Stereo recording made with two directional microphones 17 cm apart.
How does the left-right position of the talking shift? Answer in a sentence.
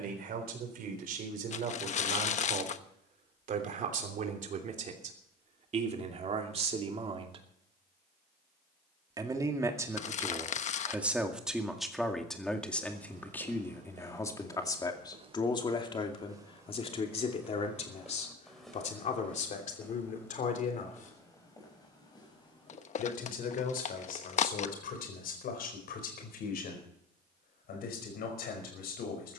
You can hear the talking move to the left.